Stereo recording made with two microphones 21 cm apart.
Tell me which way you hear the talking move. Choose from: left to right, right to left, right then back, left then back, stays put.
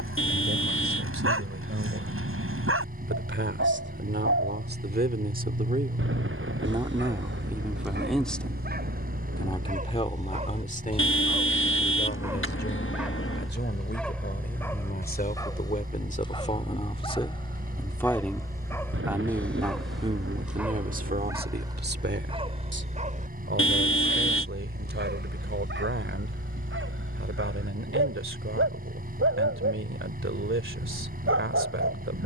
left then back.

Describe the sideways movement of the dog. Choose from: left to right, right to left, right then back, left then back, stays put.
left then back.